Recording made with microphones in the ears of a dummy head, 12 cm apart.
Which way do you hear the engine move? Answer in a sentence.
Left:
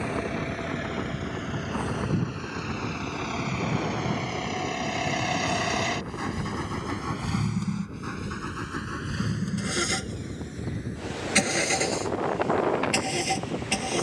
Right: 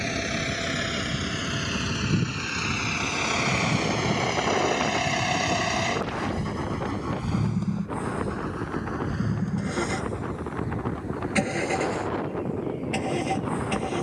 You can hear the engine travel towards the left.